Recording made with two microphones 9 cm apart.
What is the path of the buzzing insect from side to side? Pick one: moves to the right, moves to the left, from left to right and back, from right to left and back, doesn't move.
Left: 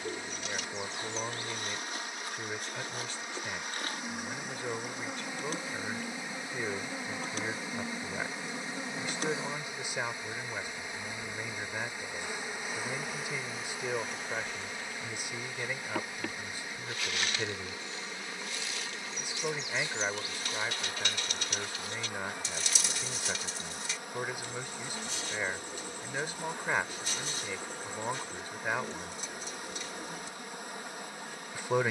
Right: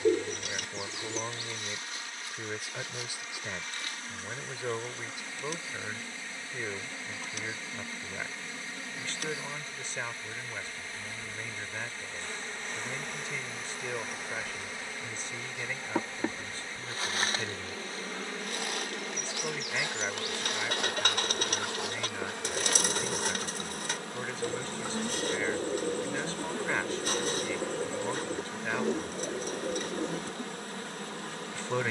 moves to the right.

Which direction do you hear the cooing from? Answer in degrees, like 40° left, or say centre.
50° right.